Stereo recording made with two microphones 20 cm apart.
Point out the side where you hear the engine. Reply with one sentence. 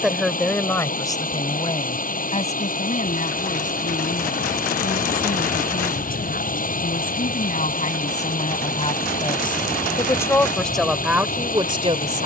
In this clip you hear the engine on the left.